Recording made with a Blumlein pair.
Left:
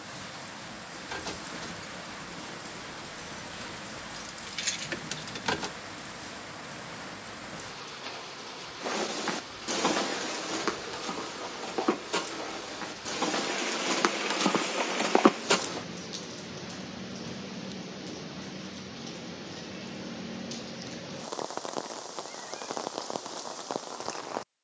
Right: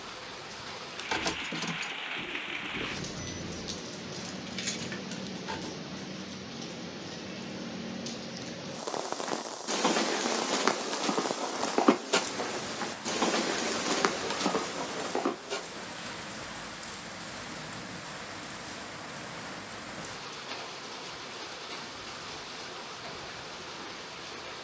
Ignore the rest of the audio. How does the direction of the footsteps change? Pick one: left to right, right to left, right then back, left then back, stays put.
right then back.